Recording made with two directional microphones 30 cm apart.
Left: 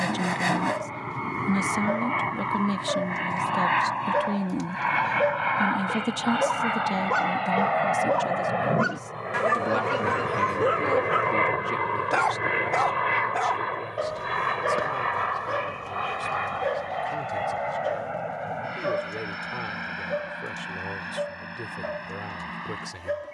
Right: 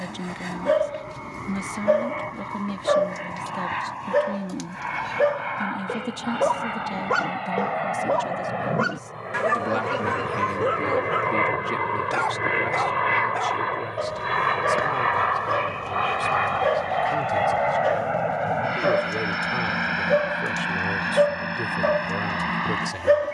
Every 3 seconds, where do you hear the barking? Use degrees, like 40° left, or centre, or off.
60° right, 50° right, 20° right, 10° left, centre, 30° right, 50° right, 70° right.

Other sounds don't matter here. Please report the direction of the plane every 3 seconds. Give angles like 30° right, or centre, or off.
50° left, 40° left, 30° left, 10° left, 20° right, 40° right, 50° right, 60° right.